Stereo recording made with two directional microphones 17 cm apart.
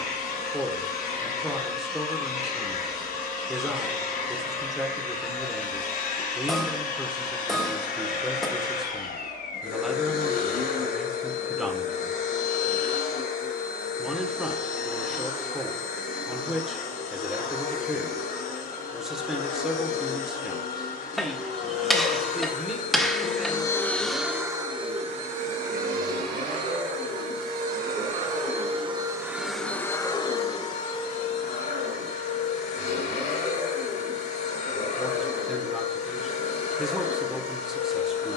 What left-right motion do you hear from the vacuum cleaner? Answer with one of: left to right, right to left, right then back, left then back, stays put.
right then back.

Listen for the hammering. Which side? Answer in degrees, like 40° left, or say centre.
centre.